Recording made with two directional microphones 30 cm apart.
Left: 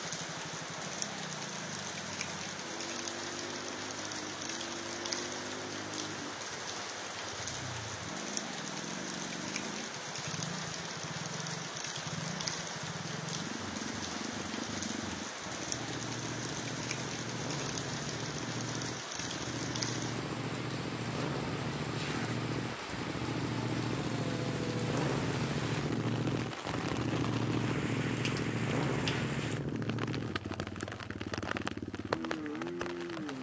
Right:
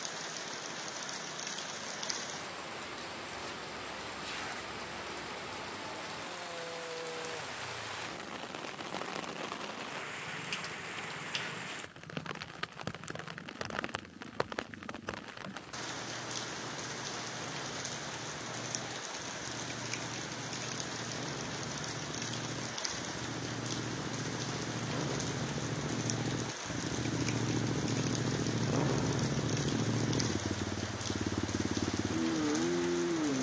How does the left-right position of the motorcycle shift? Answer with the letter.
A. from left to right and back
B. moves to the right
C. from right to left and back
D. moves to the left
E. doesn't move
B.